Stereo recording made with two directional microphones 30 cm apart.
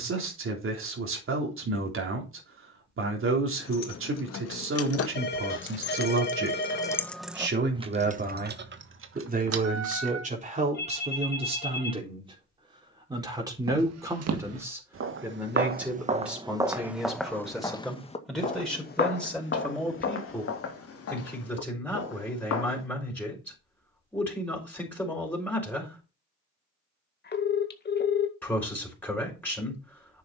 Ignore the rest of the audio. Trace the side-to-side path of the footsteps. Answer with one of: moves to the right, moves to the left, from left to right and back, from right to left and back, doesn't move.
moves to the left.